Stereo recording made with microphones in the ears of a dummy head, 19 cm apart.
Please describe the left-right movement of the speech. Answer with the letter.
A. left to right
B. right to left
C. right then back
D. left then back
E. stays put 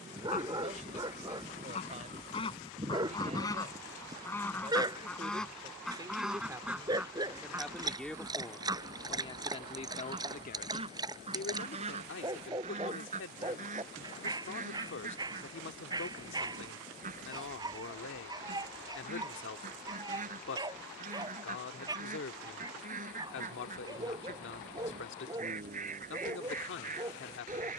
B.